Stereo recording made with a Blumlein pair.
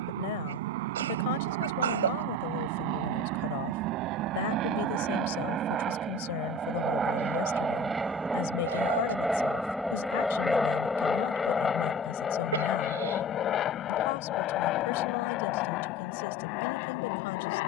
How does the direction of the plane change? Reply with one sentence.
In this clip you hear the plane move from right to left.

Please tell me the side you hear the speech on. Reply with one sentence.
You can hear the speech on the left.